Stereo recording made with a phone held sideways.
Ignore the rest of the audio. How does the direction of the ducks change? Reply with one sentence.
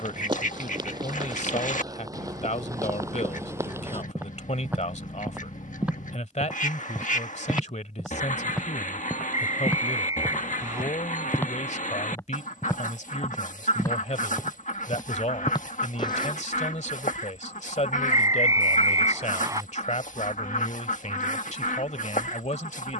You can hear the ducks stay in one place.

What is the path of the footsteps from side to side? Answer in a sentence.
You can hear the footsteps move from right to left.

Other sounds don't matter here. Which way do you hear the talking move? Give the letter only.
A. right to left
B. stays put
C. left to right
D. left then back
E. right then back
B.